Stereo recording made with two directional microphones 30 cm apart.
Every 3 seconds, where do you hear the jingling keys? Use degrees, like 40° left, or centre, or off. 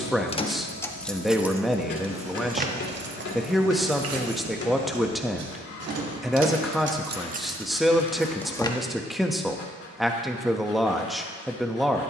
10° right, 50° right, 20° right, off.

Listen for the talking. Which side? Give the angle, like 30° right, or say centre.
centre.